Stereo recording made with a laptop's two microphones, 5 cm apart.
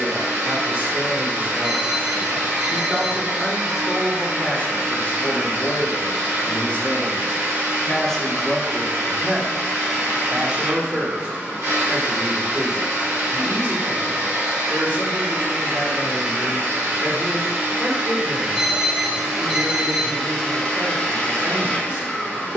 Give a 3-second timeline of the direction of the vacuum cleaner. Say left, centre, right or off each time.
right, right, right, right, right, right, centre, left.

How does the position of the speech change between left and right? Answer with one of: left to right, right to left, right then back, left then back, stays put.
left then back.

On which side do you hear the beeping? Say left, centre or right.
right.